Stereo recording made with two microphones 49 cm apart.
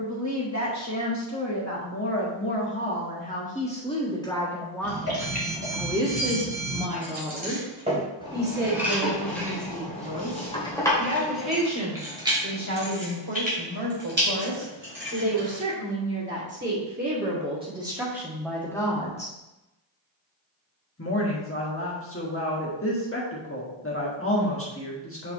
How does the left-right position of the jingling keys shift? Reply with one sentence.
You can hear the jingling keys move from right to left and back again.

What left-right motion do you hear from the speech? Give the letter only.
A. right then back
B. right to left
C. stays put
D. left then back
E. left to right
A.